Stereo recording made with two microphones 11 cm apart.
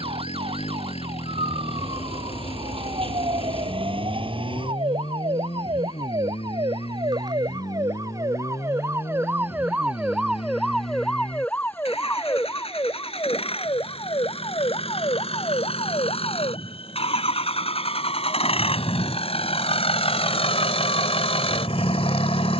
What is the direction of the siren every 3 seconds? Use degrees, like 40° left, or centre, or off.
70° right, 60° right, 40° right, centre, 40° left, 60° left, 70° left, 70° left.